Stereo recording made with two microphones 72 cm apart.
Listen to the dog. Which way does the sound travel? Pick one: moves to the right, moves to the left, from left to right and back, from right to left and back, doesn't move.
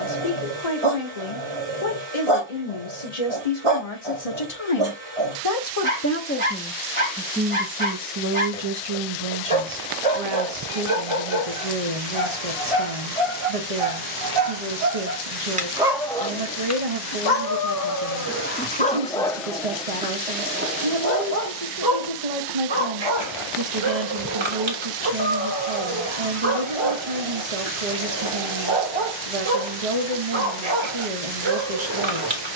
from right to left and back.